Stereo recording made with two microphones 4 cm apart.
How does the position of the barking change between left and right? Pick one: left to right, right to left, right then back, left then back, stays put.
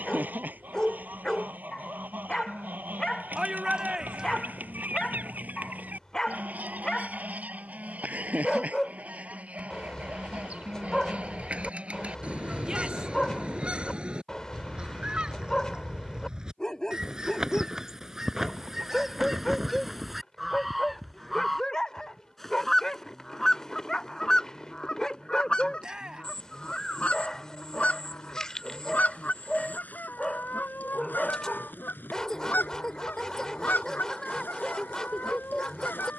stays put.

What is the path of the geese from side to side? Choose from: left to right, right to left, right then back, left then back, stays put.
right to left.